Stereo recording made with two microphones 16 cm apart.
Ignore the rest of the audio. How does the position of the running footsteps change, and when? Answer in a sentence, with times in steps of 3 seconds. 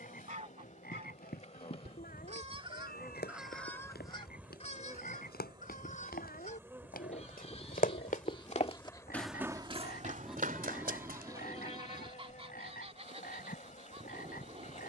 You can hear the running footsteps on the left from 0 s and on the right from 9 s.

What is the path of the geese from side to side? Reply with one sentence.
In this clip you hear the geese go left and come back.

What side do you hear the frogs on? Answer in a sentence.
You can hear the frogs on the left.